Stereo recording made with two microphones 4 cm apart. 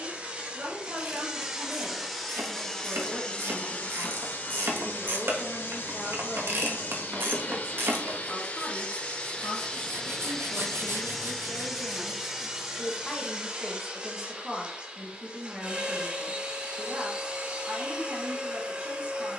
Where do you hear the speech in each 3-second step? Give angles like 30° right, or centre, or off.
40° right, 10° right, 20° left, 30° left, centre, 30° right, 40° right.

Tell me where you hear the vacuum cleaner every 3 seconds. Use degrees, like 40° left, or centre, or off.
10° right, 40° left, 50° left, 10° left, 20° right, 30° right, 30° right.